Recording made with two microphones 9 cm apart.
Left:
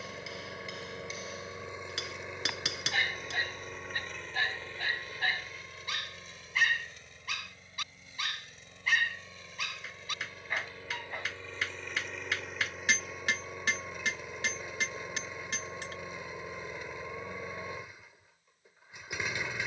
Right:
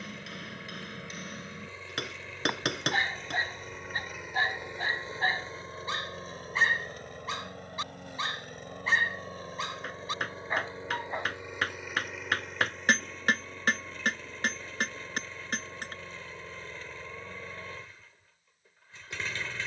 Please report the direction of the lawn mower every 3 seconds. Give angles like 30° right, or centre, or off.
20° left, 10° right, 50° right, 30° right, 10° left, 10° left, 10° left.